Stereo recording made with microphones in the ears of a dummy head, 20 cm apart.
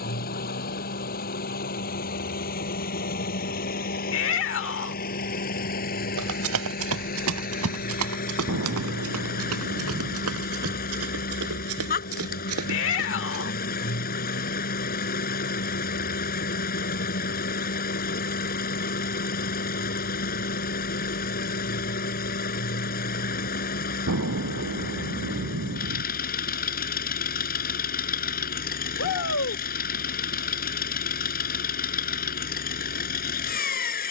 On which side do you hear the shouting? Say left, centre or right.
left.